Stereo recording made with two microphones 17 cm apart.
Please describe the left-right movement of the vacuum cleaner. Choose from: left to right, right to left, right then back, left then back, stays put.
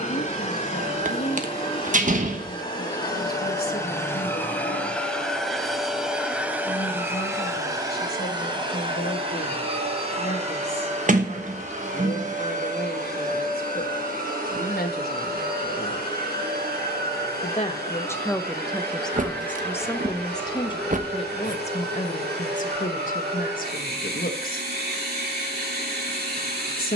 left to right.